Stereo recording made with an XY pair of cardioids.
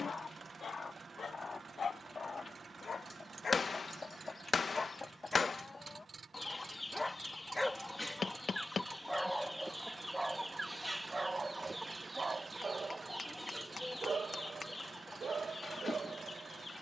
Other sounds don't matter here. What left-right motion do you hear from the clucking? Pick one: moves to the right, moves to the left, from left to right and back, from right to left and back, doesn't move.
from left to right and back.